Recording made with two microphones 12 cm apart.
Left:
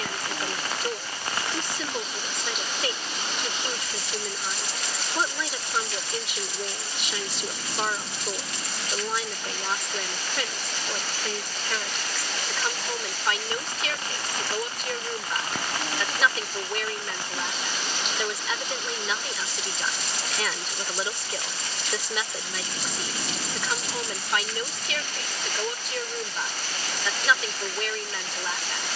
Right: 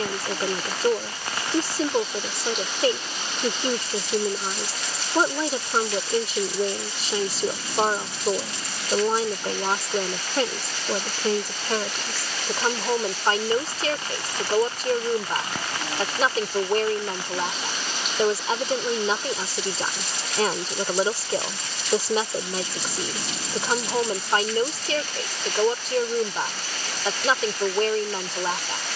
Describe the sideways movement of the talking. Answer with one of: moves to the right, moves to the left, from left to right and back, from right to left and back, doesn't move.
doesn't move.